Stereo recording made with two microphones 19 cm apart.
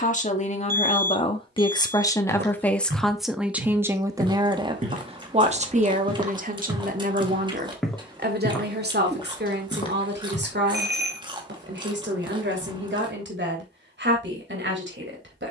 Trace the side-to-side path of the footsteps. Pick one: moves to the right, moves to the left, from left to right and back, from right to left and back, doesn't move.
moves to the left.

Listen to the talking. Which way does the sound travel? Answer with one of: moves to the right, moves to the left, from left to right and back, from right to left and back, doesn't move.
moves to the right.